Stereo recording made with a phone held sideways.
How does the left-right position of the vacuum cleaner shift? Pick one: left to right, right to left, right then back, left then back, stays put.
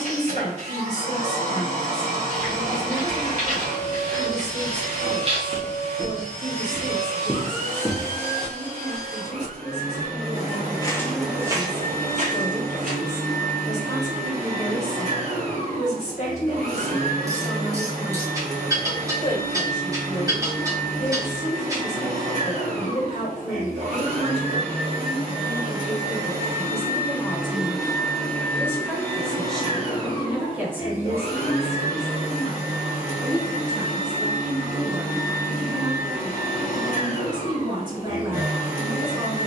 right to left.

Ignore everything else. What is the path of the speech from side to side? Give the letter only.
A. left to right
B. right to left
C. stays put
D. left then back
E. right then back
A.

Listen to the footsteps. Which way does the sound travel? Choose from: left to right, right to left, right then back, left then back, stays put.
left then back.